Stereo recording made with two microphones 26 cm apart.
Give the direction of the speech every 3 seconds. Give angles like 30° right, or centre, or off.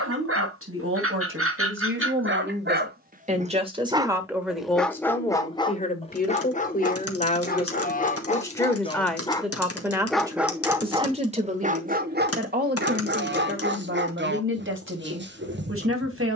50° right, centre, 20° left, 10° right, 40° right, 50° right.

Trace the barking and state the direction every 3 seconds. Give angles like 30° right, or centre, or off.
50° right, centre, 30° left, 10° right, 40° right, 40° right.